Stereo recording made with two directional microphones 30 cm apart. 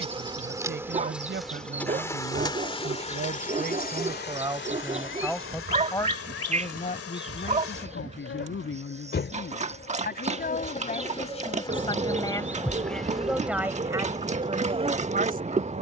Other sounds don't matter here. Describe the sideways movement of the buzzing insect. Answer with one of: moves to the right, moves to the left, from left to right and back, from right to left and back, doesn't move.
from right to left and back.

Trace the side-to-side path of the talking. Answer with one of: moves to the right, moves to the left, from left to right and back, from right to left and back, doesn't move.
from right to left and back.